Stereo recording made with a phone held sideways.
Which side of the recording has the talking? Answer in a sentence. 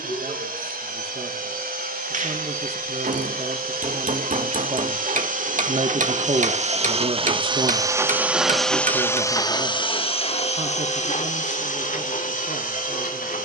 You can hear the talking on the right.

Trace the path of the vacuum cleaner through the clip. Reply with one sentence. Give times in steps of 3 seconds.
In this clip you hear the vacuum cleaner on the right from 0 s and on the left from 9 s.